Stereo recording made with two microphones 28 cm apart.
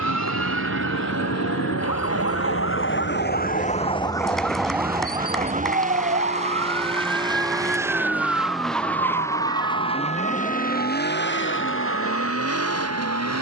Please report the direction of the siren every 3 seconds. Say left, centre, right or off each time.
left, centre, right, right, right.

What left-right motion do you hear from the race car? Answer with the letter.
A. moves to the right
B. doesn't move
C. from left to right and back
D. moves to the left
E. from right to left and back
D.